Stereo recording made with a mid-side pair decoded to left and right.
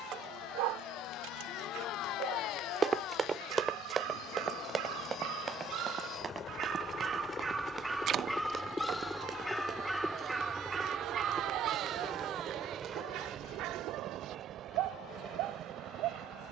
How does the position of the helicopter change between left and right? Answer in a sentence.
In this clip you hear the helicopter move from left to right.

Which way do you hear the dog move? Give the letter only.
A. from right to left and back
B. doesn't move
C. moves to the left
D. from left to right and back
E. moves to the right
A.